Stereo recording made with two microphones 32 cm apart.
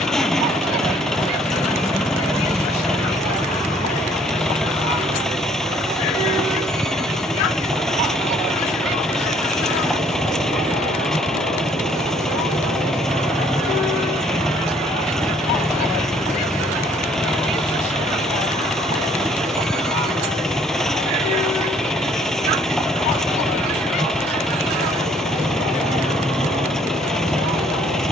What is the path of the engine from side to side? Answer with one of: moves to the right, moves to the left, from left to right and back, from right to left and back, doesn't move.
doesn't move.